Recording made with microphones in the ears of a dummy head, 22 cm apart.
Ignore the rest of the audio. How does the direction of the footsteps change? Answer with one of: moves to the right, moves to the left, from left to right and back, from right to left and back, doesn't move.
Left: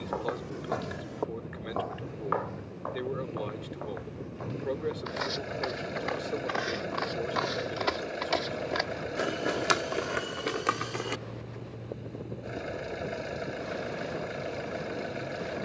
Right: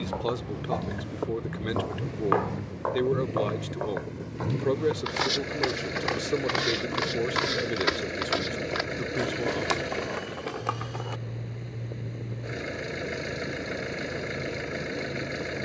from left to right and back.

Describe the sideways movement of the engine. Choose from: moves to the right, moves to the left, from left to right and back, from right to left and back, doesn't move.
doesn't move.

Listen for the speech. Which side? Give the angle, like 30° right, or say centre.
60° right.